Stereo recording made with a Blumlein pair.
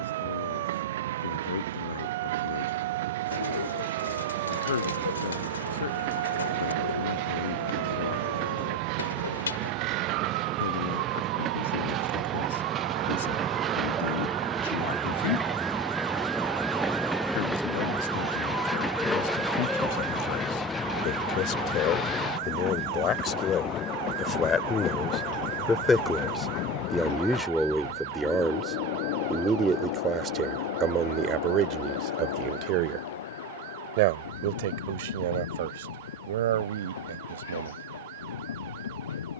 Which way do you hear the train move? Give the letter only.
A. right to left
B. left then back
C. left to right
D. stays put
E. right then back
A.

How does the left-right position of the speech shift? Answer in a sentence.
In this clip you hear the speech move to the right.